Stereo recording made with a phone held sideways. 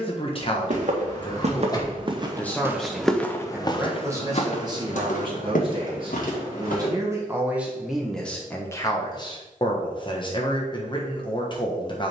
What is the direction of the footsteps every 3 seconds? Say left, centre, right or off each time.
right, left, left, off.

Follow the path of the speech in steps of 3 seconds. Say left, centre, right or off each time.
left, right, centre, left.